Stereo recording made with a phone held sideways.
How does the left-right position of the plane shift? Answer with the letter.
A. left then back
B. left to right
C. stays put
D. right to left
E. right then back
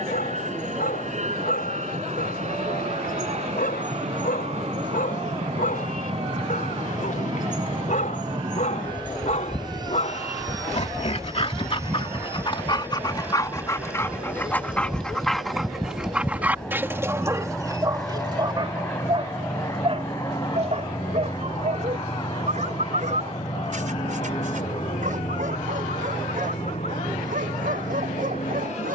D.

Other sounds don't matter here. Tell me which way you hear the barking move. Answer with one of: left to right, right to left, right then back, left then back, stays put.
left to right.